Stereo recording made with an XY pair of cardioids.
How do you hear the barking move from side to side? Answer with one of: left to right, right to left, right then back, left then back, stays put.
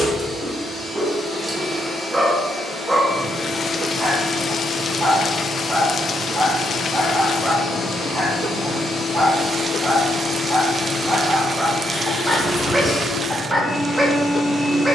stays put.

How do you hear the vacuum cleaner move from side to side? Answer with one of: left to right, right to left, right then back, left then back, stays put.
left then back.